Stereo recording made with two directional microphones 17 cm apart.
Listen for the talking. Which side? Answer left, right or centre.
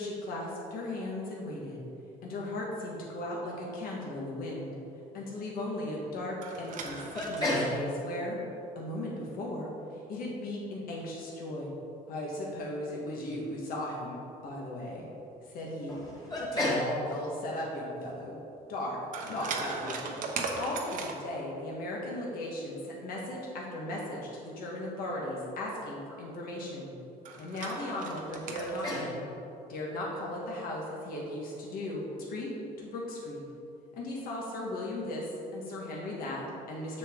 left.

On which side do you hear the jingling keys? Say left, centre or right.
right.